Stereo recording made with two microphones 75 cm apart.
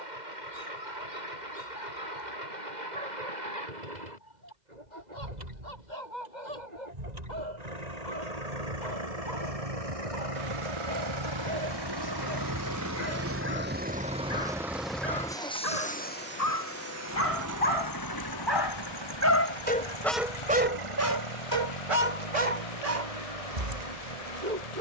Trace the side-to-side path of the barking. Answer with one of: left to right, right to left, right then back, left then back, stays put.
left to right.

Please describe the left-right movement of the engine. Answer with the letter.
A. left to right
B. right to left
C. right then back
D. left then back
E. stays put
B.